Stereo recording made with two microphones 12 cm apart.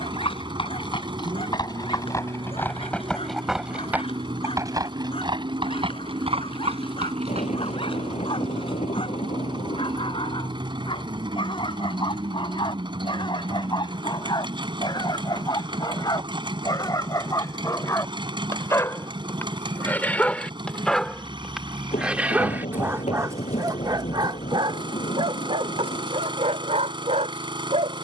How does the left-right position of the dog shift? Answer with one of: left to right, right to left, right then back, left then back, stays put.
left to right.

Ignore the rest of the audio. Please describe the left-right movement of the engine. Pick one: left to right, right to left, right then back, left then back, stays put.
stays put.